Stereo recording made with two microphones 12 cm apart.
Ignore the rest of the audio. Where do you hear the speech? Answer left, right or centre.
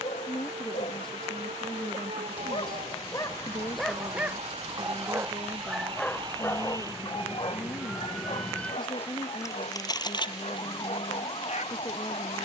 left.